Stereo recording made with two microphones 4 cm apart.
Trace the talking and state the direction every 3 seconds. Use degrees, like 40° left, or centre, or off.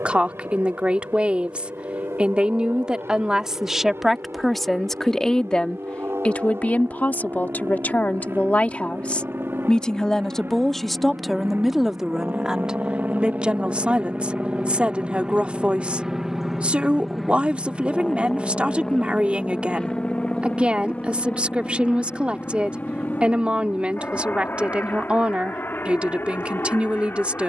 30° right, centre, 40° left, 10° left, 20° right, 30° right, 30° right, 30° right, 30° right.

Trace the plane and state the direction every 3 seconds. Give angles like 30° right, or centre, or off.
80° right, 70° right, 60° right, 50° right, 30° right, 10° right, 20° left, 40° left, 50° left.